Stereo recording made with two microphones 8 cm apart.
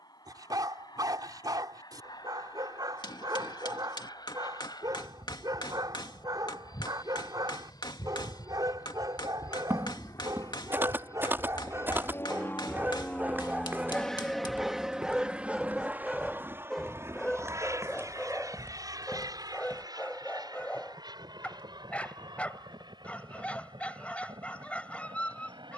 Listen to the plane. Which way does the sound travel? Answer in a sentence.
In this clip you hear the plane go from the left side to the right.